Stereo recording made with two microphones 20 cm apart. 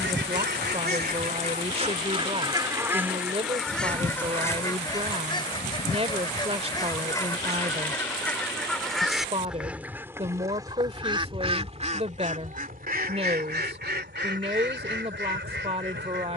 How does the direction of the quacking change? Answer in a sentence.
You can hear the quacking move from right to left and back again.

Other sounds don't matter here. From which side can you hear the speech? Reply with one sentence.
In this clip you hear the speech on the right.